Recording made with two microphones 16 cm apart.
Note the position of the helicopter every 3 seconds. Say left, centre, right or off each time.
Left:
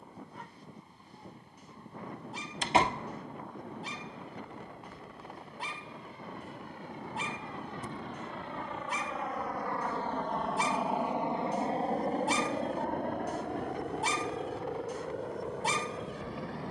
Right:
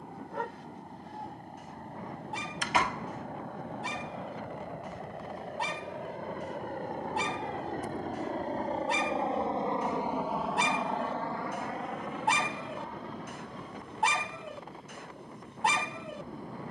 right, right, right, centre, left, left.